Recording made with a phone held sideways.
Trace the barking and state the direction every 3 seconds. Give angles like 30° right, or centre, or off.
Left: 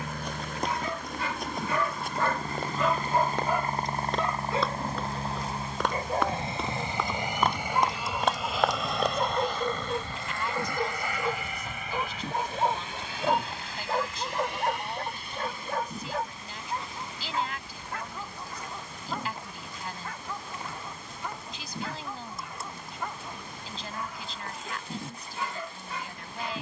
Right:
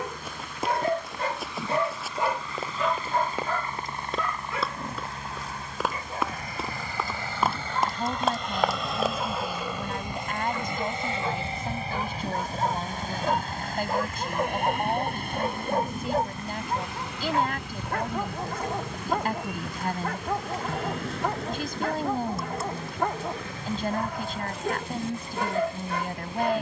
40° right, 20° left, 40° left, 30° left, centre, 40° right, 70° right, 70° right, 70° right.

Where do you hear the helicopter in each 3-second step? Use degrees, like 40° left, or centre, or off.
50° left, 40° left, 20° left, 20° right, 40° right, 60° right, 70° right, 70° right, 80° right.